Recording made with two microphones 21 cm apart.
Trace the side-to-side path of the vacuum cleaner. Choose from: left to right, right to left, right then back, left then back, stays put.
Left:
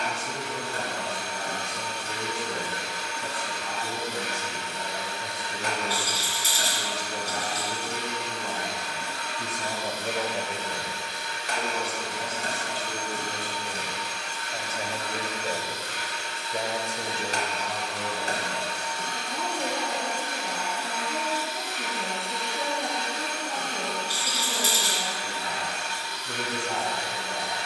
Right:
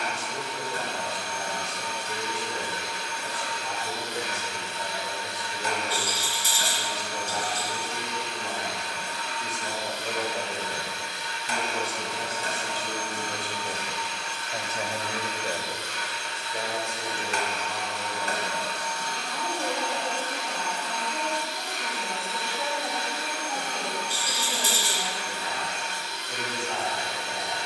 left to right.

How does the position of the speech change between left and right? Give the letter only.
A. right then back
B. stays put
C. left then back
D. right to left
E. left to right
A.